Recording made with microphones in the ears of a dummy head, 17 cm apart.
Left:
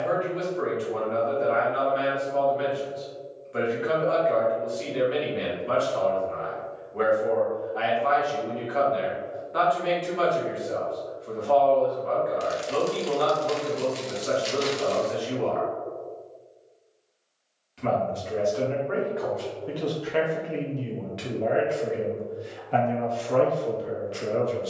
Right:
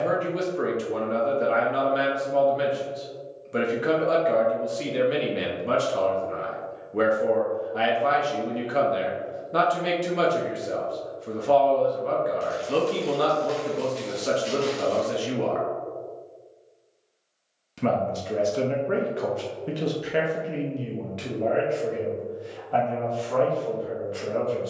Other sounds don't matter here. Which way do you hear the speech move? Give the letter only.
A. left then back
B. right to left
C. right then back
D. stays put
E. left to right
B.